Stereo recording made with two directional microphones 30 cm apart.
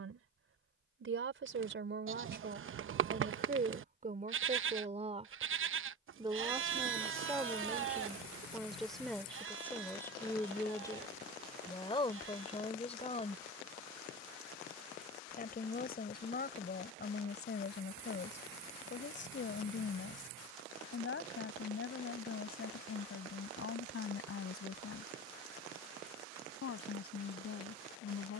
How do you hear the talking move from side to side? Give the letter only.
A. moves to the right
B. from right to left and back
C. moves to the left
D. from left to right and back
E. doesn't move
C.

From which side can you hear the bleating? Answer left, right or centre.
right.